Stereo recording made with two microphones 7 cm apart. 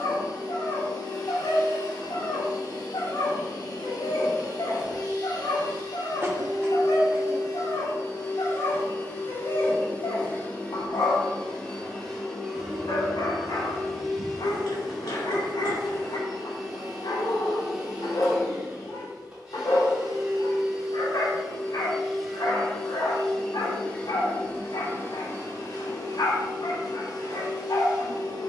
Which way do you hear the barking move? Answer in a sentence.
You can hear the barking stay in one place.